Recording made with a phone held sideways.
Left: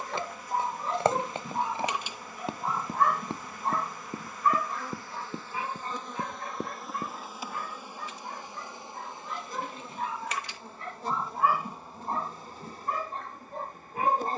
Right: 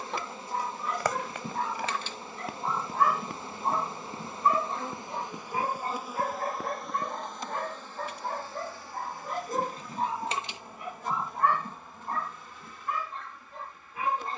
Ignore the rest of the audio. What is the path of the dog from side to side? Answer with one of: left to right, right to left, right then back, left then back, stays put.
right then back.